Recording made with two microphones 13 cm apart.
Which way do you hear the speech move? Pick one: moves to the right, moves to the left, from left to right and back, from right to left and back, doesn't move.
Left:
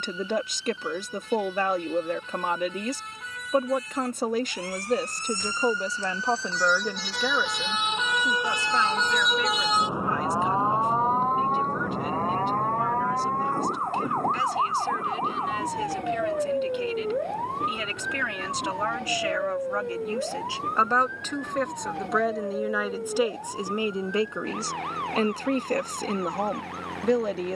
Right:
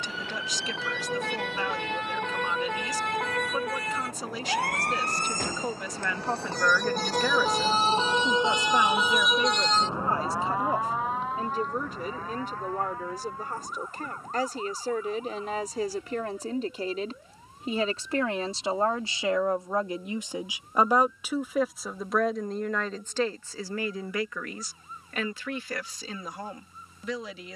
from left to right and back.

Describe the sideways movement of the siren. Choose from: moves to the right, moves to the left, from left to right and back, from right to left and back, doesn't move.
moves to the left.